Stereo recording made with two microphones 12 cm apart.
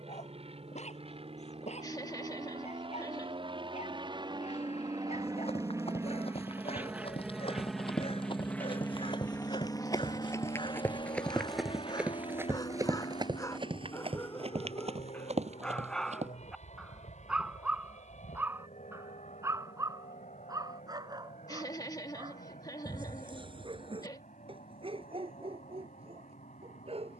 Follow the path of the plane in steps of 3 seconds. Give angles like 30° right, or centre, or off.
60° right, 40° right, centre, 30° left, 50° left, 60° left, 70° left, 70° left, 70° left.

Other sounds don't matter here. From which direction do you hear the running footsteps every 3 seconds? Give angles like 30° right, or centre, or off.
off, 60° left, 50° left, 20° left, 40° right, 70° right, off, off, off.